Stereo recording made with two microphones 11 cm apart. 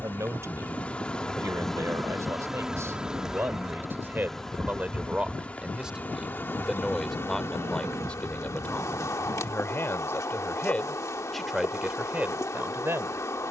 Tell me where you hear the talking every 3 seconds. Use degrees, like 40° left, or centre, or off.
30° right, 10° right, 10° left, 10° left, 20° right.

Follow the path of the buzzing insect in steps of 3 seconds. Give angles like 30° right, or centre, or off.
10° left, 10° left, 20° left, 30° left, 30° left.